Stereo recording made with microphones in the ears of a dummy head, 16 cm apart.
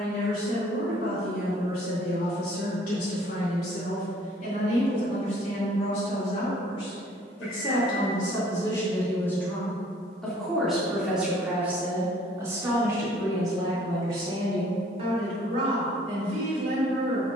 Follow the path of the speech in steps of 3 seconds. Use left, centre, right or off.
left, left, left, centre, right, right.